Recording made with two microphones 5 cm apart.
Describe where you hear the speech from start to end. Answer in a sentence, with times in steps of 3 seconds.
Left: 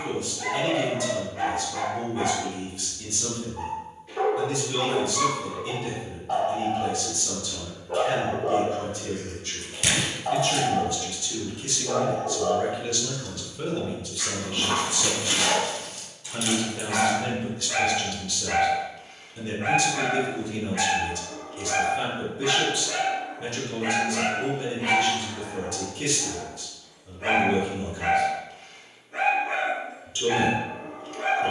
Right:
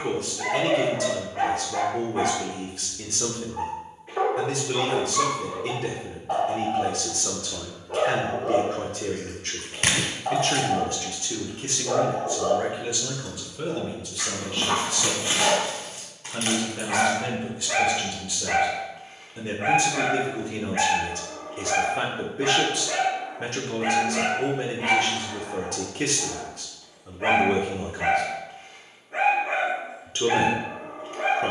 In this clip you hear the speech on the right from 0 s, in the centre from 12 s and on the right from 18 s.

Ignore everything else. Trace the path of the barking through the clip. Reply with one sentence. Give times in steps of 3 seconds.
In this clip you hear the barking on the right from 0 s, in the centre from 6 s and on the right from 12 s.